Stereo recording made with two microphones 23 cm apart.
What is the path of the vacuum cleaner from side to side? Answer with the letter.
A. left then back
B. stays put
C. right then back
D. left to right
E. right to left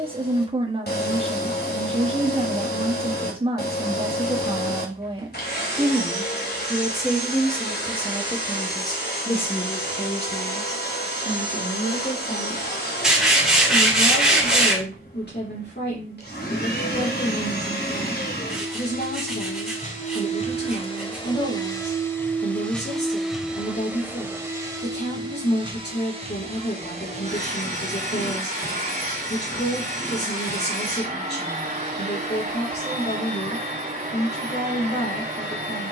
D.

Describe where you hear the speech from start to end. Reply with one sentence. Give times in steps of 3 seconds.
You can hear the speech on the right from 0 s, in the centre from 6 s and on the left from 9 s.